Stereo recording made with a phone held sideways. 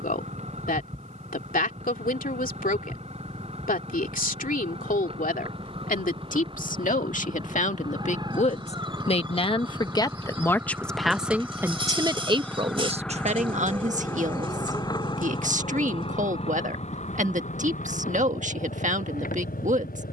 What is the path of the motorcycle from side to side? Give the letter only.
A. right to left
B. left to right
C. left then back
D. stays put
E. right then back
A.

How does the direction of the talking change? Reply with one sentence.
You can hear the talking go from the left side to the right.